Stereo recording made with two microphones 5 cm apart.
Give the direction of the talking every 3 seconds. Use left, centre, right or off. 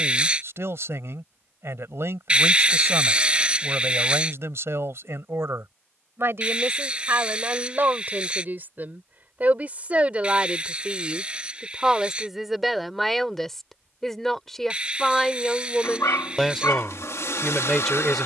right, right, right, right, centre, centre.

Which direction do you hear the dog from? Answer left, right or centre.
left.